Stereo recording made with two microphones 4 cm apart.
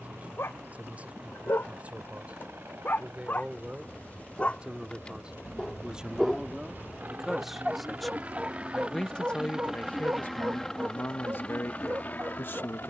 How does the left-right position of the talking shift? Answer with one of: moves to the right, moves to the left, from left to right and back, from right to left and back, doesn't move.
moves to the left.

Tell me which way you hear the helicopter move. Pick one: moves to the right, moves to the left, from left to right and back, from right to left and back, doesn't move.
moves to the left.